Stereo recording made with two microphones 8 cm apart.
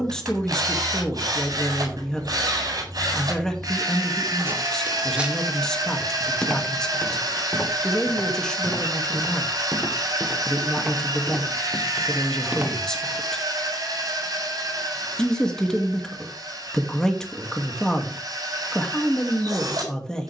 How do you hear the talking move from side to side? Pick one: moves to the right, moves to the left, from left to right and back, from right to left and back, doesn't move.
doesn't move.